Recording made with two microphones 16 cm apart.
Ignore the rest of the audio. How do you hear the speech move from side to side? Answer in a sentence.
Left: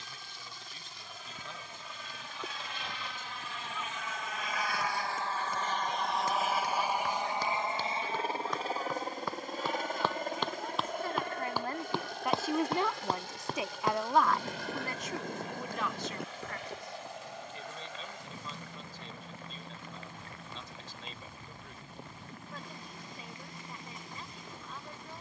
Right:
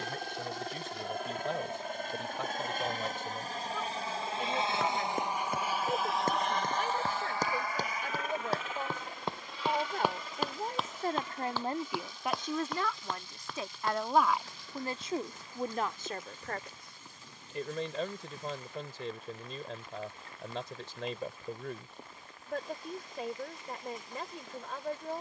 In this clip you hear the speech move from right to left and back again.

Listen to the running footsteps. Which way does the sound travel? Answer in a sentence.
In this clip you hear the running footsteps move to the left.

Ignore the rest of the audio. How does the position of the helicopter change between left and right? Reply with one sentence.
You can hear the helicopter travel towards the left.